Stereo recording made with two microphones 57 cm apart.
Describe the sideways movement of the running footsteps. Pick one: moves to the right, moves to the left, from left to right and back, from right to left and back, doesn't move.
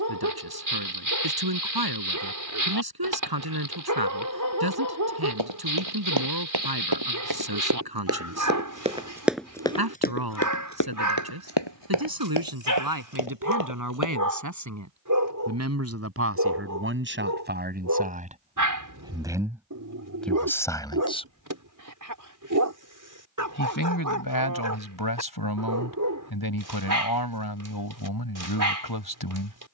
moves to the left.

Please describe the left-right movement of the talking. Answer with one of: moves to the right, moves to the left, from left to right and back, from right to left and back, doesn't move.
moves to the left.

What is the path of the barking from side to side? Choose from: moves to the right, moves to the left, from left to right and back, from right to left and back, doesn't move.
doesn't move.